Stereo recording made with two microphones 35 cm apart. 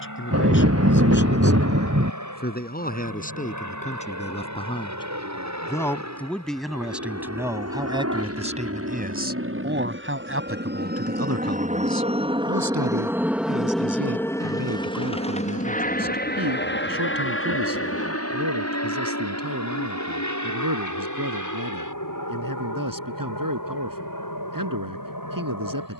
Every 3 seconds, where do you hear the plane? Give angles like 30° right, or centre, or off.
70° right, 60° right, 50° right, 30° right, centre, 30° left, 50° left, 60° left, 70° left.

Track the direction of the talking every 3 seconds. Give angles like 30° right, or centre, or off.
30° left, 20° left, 10° right, 40° right, 70° right, 80° right, 80° right, 80° right, 80° right.